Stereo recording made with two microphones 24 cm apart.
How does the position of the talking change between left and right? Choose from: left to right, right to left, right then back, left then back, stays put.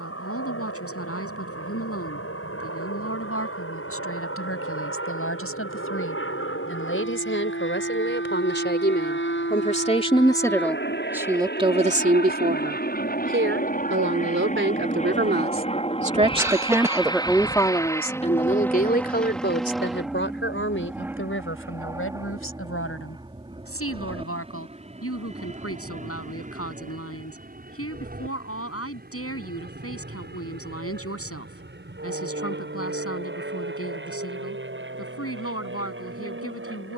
right then back.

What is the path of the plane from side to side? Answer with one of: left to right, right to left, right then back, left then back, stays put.
left to right.